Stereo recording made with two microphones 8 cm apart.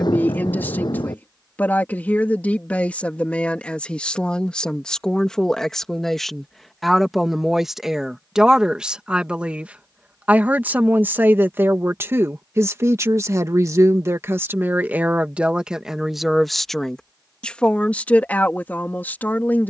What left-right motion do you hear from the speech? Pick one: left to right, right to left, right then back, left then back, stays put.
right then back.